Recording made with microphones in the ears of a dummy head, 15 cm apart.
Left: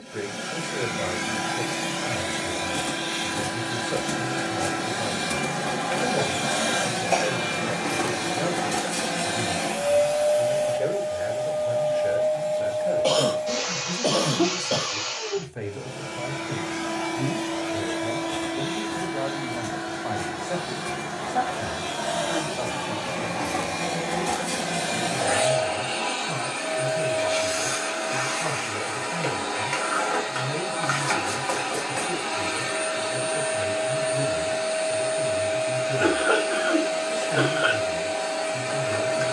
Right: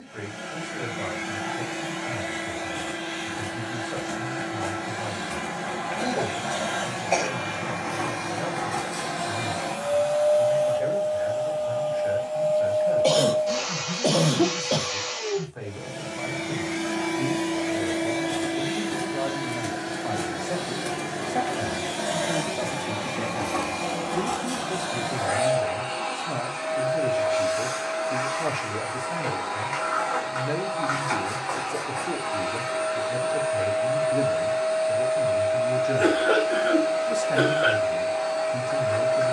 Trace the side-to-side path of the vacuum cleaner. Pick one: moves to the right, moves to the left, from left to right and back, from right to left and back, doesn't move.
from left to right and back.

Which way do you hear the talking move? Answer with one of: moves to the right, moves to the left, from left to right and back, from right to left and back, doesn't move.
moves to the right.